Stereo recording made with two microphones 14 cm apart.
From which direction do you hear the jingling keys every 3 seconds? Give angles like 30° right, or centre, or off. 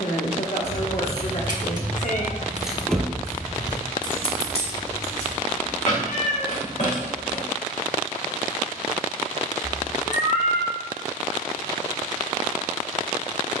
30° right, 40° left, 60° left, off, off.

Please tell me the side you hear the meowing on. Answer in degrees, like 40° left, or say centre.
60° left.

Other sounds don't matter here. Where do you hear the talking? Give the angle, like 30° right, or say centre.
60° left.